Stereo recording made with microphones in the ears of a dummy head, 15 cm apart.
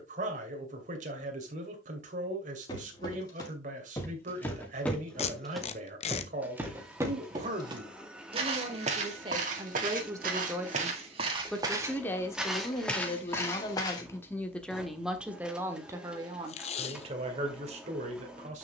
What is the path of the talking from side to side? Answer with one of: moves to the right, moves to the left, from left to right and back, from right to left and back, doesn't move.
from right to left and back.